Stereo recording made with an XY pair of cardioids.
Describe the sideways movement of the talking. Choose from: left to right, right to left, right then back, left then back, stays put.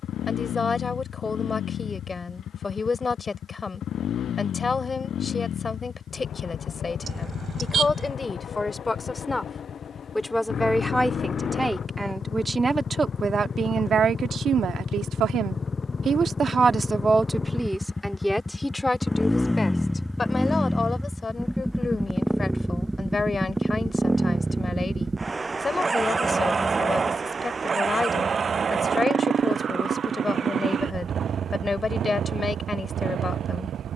right then back.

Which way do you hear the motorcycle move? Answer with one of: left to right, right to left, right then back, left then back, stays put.
left to right.